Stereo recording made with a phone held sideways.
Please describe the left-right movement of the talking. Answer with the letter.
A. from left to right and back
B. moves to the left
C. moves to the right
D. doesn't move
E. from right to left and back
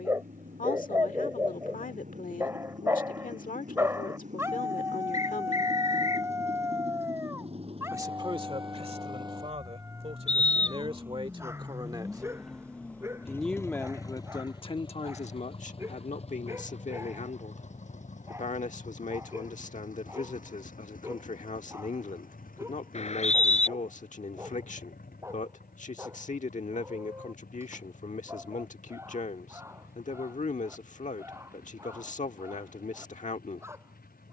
A.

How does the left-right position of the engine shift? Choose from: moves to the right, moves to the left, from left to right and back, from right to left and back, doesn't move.
moves to the left.